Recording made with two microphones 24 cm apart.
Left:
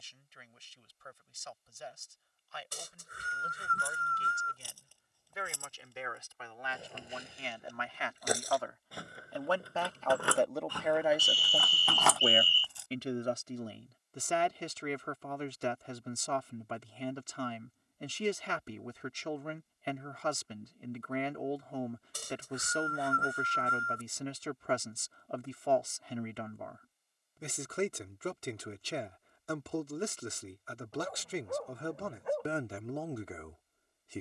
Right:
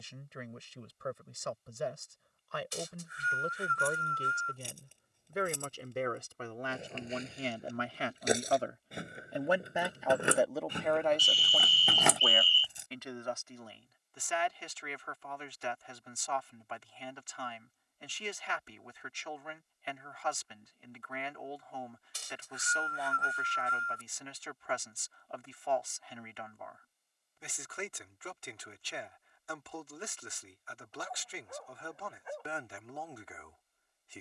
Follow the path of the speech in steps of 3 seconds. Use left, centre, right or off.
right, right, right, centre, left, left, left, left, left, left, left, left.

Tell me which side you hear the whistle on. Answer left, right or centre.
left.